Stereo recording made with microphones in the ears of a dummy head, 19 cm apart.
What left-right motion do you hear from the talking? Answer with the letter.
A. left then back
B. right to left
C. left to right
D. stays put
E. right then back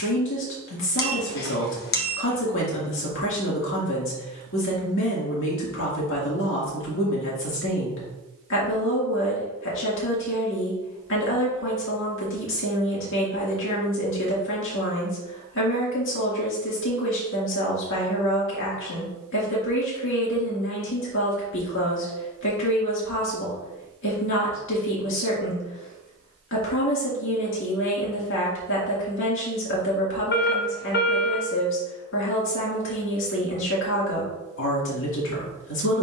D.